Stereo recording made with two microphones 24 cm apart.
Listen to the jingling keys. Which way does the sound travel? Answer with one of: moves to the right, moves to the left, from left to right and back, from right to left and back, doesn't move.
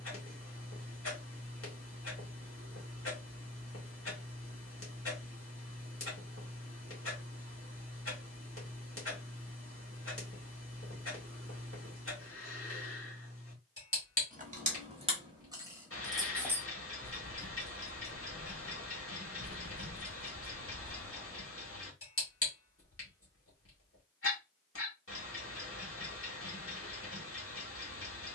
from right to left and back.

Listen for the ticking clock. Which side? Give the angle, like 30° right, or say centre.
60° left.